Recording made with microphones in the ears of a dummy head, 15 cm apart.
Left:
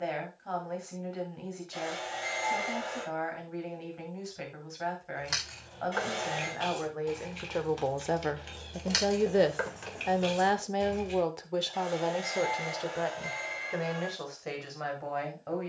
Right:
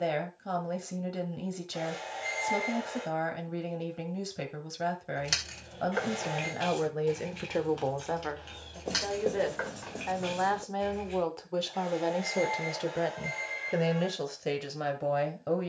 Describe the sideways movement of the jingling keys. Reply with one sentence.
You can hear the jingling keys go from the right side to the left.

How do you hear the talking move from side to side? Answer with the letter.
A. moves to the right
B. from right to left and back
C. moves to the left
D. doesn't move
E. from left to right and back
B.